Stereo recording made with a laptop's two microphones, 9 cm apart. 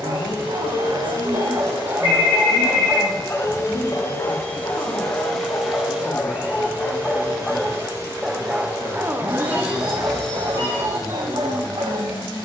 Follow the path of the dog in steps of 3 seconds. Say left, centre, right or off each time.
right, left, centre, right.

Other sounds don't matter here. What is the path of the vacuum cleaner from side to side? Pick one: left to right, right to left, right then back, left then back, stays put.
right then back.